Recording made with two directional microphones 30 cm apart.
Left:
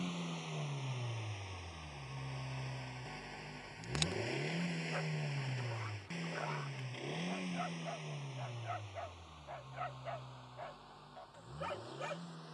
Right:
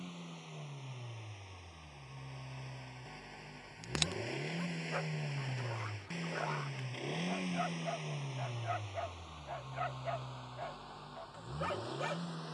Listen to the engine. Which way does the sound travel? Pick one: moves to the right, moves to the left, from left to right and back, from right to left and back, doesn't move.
moves to the right.